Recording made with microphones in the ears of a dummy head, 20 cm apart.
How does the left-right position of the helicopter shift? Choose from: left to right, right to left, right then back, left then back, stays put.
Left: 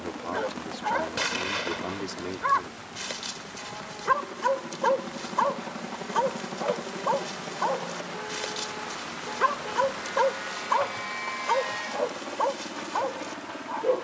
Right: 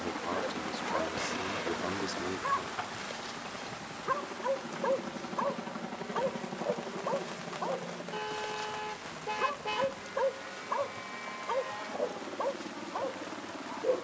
right to left.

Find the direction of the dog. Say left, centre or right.
left.